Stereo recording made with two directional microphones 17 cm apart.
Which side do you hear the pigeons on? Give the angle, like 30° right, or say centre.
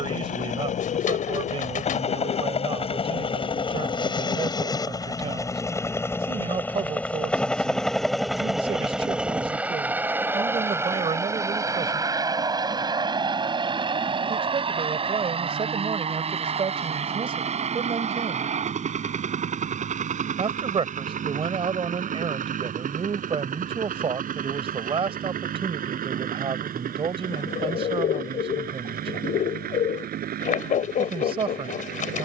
50° left.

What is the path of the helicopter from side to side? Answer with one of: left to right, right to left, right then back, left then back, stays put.
left to right.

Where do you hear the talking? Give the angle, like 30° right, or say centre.
30° right.